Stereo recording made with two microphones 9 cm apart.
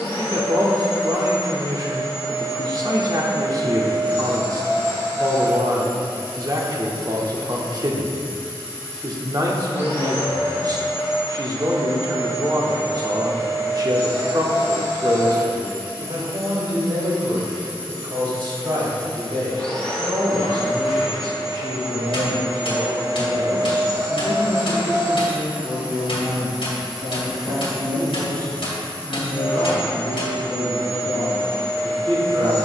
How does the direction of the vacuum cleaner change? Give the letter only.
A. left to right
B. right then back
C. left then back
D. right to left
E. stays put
B.